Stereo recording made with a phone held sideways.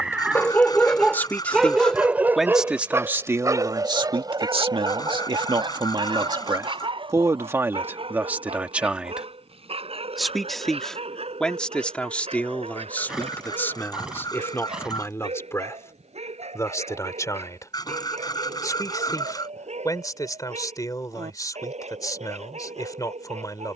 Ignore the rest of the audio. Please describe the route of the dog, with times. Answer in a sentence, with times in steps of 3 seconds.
In this clip you hear the dog in the centre from 0 s and on the right from 3 s.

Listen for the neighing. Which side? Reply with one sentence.
In this clip you hear the neighing in the centre.